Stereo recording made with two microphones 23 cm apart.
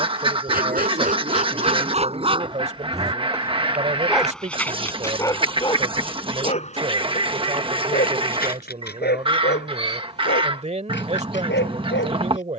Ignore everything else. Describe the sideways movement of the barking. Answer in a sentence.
In this clip you hear the barking travel towards the left.